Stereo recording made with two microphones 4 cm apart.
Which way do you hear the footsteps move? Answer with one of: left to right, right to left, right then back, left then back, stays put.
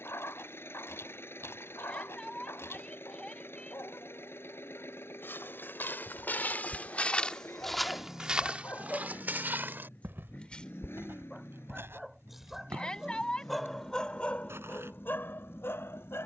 left to right.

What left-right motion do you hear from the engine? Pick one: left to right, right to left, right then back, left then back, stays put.
stays put.